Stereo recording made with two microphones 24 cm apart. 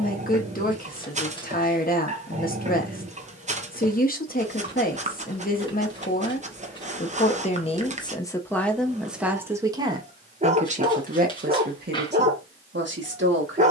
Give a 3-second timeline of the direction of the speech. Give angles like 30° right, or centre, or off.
40° left, 40° left, 20° left, 30° right, 50° right.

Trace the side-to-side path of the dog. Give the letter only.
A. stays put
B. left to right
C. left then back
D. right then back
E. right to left
A.